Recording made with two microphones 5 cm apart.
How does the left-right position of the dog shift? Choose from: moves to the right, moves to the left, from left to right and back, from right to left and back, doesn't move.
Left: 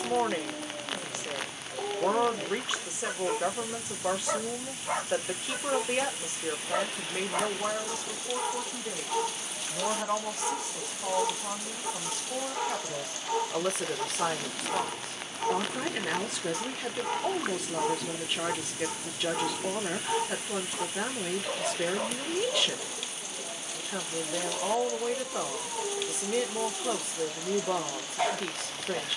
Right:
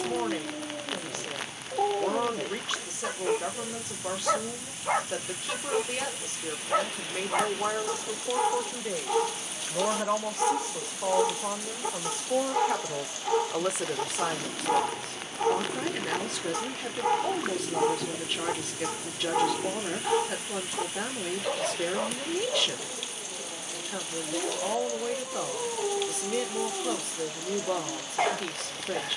doesn't move.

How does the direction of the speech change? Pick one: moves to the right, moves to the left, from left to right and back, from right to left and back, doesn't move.
from left to right and back.